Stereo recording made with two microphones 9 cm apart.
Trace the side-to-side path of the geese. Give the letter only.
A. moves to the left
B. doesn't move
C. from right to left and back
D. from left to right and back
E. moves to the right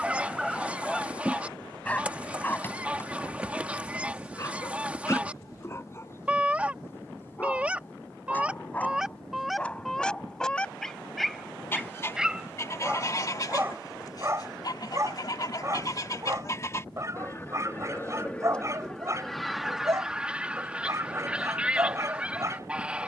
C.